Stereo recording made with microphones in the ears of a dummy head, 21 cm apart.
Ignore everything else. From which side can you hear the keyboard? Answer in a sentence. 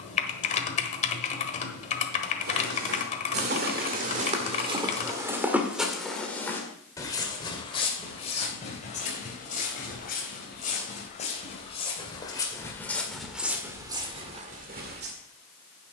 In this clip you hear the keyboard on the left.